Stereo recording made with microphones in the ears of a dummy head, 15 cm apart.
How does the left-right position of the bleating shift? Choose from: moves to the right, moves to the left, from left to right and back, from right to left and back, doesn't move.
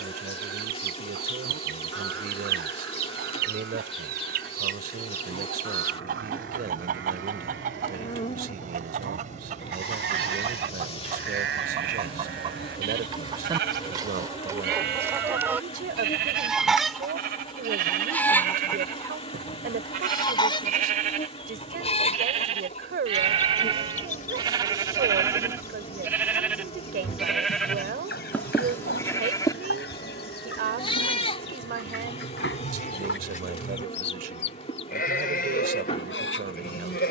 moves to the left.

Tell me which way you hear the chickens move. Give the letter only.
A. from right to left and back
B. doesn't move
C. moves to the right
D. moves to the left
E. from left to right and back
D.